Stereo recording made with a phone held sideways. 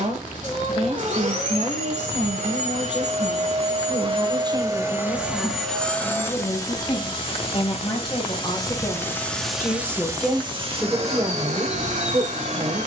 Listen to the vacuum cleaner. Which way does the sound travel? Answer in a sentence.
You can hear the vacuum cleaner move from right to left and back again.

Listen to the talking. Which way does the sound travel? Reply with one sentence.
In this clip you hear the talking move from right to left and back again.